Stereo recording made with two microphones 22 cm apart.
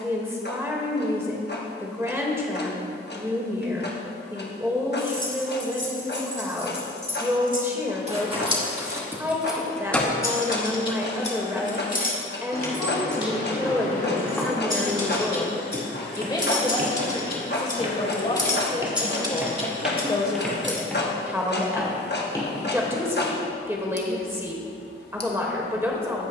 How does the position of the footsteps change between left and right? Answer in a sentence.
You can hear the footsteps move from left to right and back again.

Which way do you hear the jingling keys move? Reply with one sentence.
In this clip you hear the jingling keys go left and come back.